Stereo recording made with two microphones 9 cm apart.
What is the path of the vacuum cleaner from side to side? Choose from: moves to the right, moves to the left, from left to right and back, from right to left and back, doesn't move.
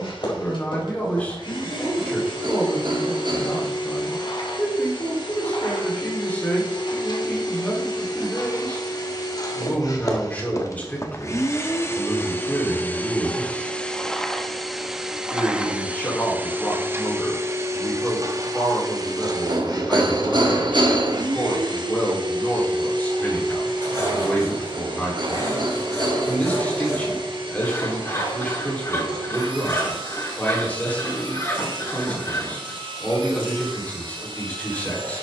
moves to the right.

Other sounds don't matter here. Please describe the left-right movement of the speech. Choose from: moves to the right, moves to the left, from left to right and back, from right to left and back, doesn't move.
doesn't move.